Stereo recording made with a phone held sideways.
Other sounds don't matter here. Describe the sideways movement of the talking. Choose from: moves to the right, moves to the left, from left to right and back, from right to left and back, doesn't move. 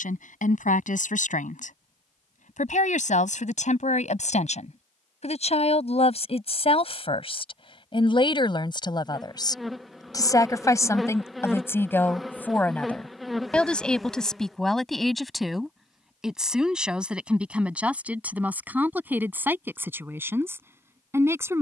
moves to the right.